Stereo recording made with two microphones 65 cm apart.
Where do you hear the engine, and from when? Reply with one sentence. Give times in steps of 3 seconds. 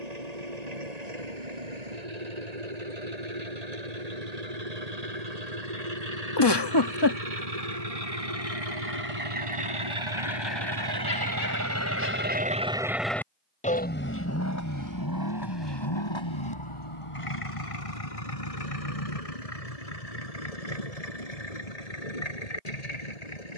In this clip you hear the engine on the right from 0 s, in the centre from 12 s and on the left from 15 s.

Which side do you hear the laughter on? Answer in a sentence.
You can hear the laughter on the left.